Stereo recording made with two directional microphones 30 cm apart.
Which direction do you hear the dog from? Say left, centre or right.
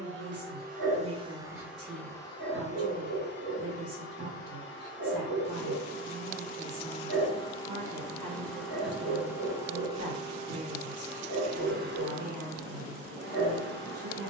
right.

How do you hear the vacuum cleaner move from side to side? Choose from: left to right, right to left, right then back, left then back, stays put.
left then back.